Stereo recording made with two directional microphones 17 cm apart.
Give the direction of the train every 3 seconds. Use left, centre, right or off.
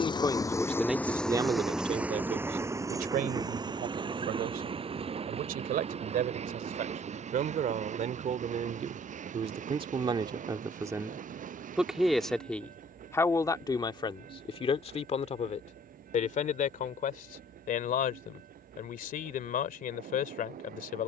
centre, right, right, right, right, right, right.